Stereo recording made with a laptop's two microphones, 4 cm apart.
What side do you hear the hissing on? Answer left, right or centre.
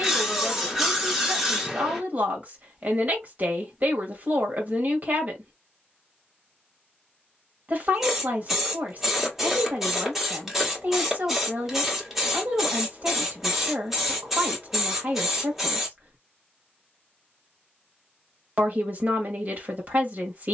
centre.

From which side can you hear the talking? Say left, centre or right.
right.